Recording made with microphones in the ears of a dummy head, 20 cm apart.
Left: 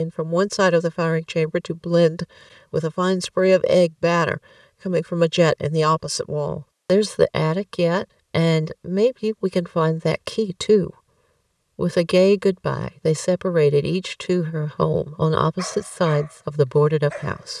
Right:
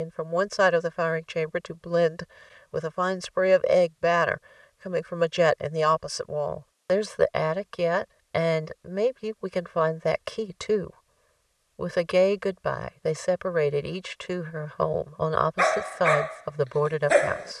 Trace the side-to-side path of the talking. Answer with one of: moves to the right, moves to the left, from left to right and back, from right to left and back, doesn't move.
doesn't move.